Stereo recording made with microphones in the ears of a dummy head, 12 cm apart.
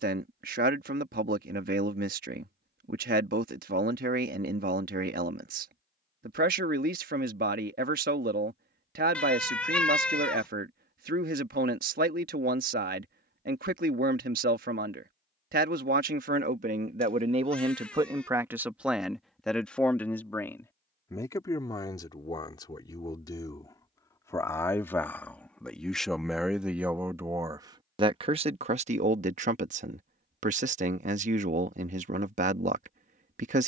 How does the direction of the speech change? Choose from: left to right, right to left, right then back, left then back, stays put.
left then back.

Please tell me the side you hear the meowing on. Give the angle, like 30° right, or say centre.
10° left.